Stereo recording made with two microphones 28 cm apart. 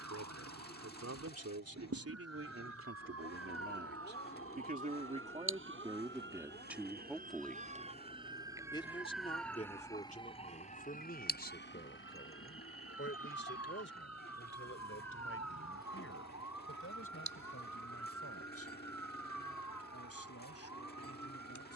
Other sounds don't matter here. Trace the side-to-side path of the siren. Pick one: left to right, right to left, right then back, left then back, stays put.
right to left.